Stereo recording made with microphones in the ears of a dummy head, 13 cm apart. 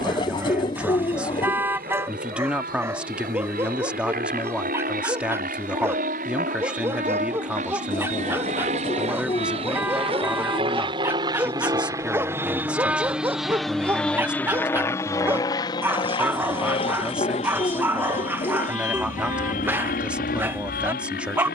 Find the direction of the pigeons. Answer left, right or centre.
left.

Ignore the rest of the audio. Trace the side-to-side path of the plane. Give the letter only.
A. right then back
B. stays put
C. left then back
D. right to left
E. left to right
D.